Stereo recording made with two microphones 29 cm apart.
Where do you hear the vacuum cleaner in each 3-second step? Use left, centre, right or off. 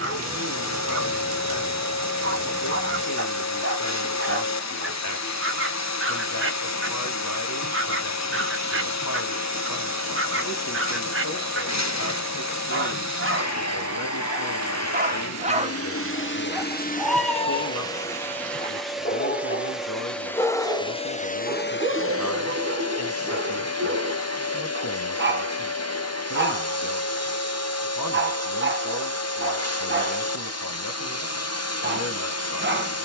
left, left, left, left, left, left, centre, left, left, left, left.